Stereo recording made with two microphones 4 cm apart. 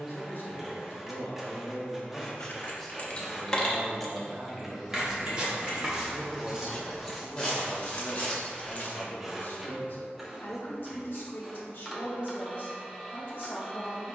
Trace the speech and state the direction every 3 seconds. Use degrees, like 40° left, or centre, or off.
40° left, 10° right, 20° left, 50° left, 50° left.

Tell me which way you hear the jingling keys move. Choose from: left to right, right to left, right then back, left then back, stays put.
right then back.